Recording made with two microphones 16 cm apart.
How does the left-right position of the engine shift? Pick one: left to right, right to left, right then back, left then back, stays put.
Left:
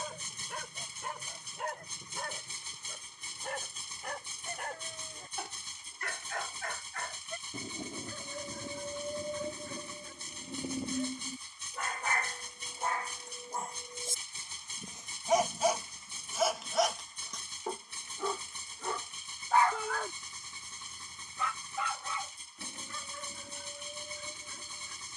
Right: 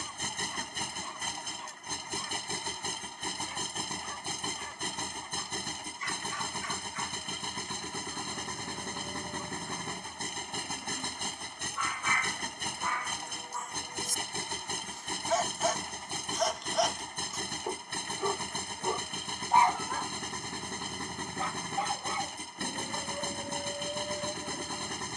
stays put.